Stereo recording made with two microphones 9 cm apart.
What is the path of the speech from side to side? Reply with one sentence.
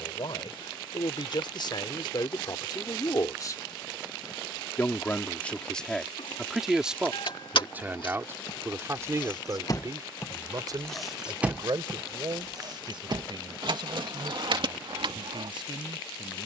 In this clip you hear the speech go from the left side to the right.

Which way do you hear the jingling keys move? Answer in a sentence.
In this clip you hear the jingling keys travel towards the right.